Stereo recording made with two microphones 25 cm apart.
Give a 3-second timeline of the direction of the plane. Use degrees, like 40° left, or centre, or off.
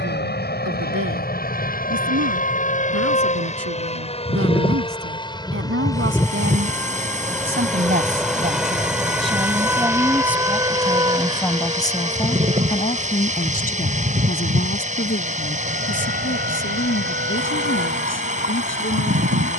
40° left, 20° left, centre, 10° right, 30° right, 40° right, 40° right.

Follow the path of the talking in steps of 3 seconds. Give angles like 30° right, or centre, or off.
70° right, 60° right, 40° right, centre, 30° left, 50° left, 50° left.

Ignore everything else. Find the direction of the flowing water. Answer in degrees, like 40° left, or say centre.
30° right.